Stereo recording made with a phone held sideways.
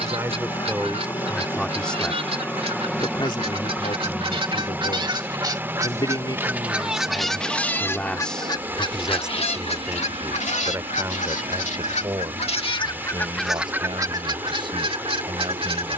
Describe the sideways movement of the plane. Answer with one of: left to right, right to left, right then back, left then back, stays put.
left to right.